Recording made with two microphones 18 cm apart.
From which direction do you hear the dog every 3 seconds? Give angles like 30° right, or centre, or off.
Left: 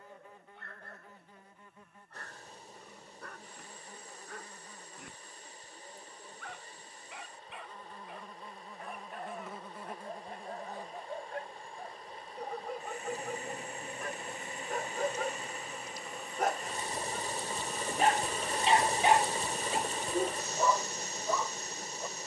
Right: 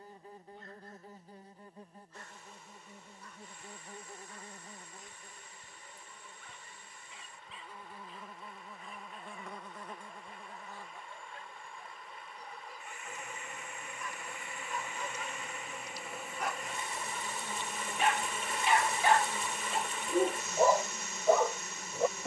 60° left, 60° left, 60° left, 60° left, 60° left, 50° left, centre, 70° right.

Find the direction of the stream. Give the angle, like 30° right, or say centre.
40° left.